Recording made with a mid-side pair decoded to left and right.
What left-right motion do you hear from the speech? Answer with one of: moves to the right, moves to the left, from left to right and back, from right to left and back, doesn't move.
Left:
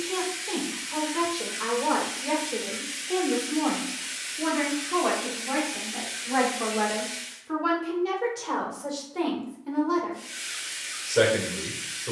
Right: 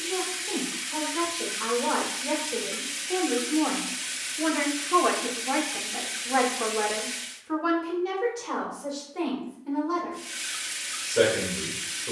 from left to right and back.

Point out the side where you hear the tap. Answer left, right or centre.
right.